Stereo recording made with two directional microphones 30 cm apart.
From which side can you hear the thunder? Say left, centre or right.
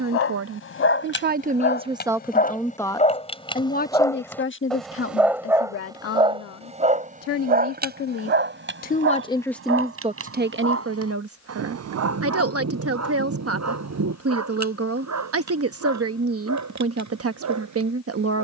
right.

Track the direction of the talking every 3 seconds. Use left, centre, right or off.
right, left, left, right, right, right.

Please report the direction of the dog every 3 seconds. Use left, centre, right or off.
left, centre, right, right, right, right.